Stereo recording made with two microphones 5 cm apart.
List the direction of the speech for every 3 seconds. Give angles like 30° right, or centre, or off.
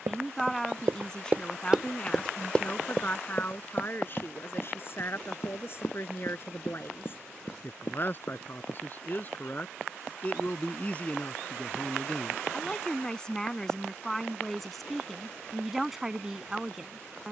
20° left, 40° left, 40° left, 30° left, 10° left, 10° right.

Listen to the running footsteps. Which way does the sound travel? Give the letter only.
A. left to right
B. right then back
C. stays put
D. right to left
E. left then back
D.